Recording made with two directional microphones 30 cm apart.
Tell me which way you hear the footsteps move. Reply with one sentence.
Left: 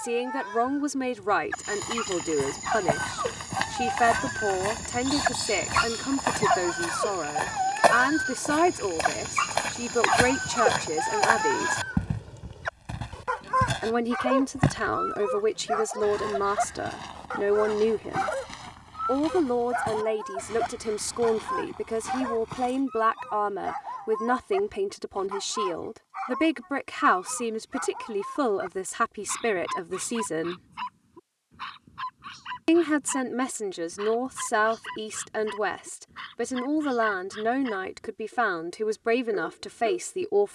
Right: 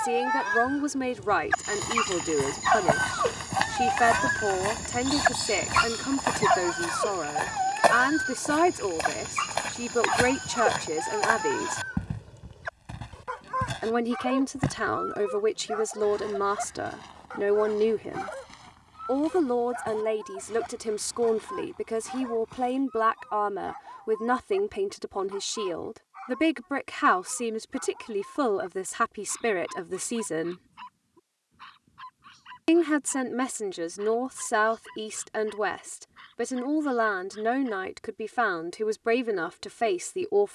In this clip you hear the footsteps move from right to left.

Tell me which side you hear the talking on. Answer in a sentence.
In this clip you hear the talking in the centre.